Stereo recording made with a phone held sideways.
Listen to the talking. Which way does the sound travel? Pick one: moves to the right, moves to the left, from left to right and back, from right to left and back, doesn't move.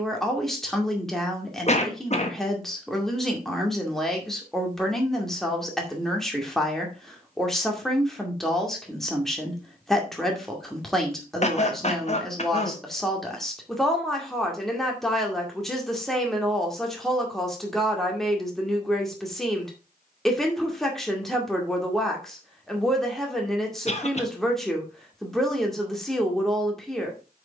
doesn't move.